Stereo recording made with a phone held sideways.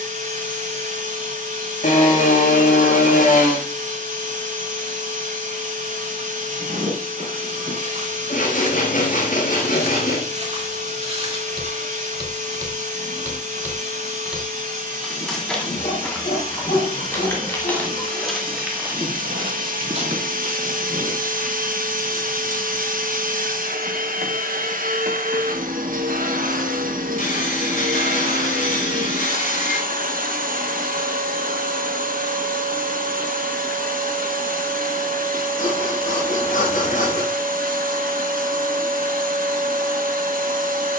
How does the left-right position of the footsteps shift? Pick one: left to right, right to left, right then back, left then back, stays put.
left then back.